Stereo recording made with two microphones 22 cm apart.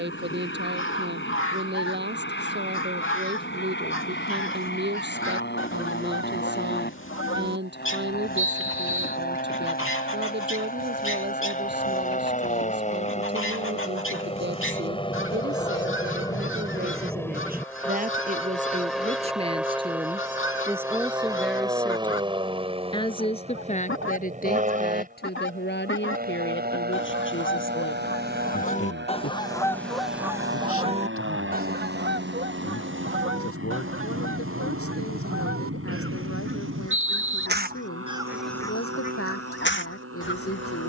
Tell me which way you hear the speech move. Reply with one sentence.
You can hear the speech move to the left.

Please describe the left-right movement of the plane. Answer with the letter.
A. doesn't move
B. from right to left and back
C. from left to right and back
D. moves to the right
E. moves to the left
D.